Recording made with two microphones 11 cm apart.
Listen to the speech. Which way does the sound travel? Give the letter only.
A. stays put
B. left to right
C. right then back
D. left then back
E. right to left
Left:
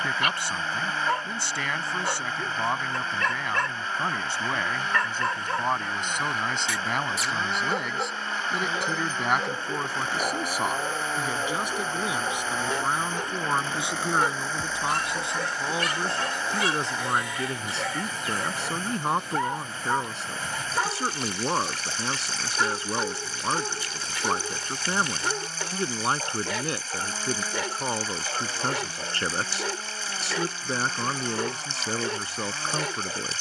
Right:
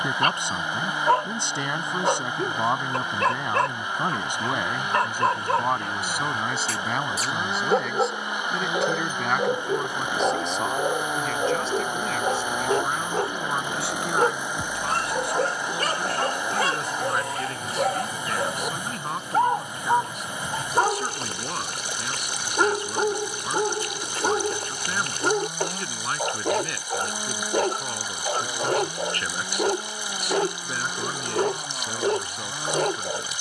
E.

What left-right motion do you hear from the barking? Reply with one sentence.
In this clip you hear the barking stay put.